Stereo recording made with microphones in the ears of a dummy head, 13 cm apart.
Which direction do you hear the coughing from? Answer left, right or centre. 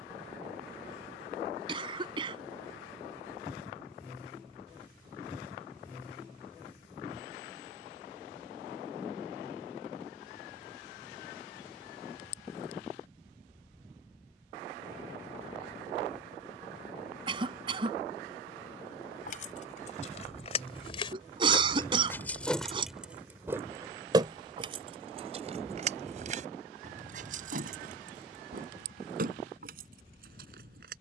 right.